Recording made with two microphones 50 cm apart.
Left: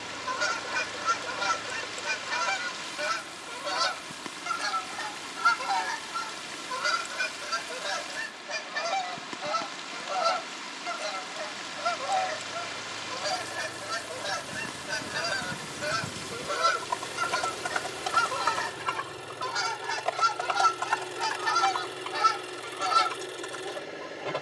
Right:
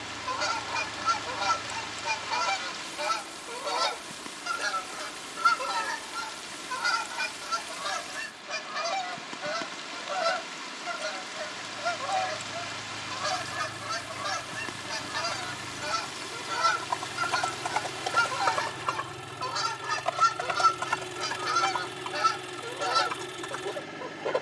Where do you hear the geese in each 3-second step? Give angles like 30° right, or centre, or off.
40° left, 20° left, 20° right, 40° right, 30° right, 20° right, centre, 20° left.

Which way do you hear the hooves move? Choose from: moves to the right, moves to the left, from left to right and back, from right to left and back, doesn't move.
moves to the right.